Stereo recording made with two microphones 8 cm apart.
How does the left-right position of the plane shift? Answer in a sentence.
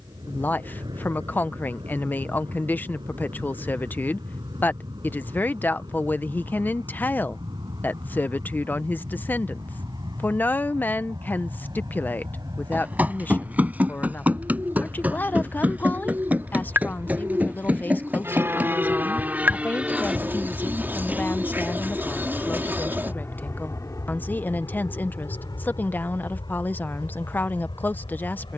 In this clip you hear the plane move to the left.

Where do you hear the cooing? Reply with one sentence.
In this clip you hear the cooing on the right.